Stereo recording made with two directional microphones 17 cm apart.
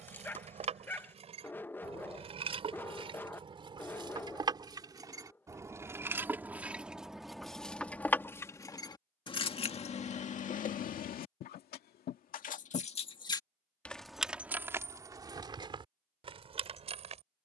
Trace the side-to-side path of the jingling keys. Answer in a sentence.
You can hear the jingling keys go left and come back.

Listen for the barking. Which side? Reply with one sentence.
In this clip you hear the barking in the centre.